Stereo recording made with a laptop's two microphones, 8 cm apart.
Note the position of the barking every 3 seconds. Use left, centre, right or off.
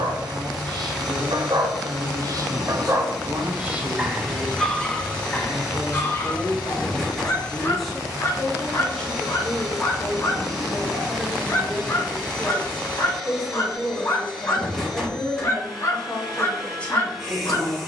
right, centre, left, left, left, left.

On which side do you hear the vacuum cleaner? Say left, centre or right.
centre.